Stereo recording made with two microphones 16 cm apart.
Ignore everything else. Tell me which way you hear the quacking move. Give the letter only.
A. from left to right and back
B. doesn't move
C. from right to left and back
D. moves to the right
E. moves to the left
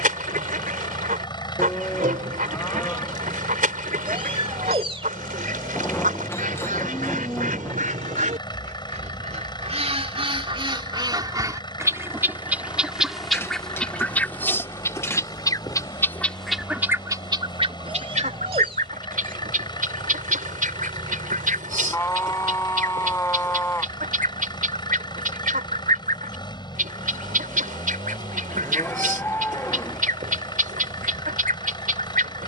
C.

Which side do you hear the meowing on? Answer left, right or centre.
right.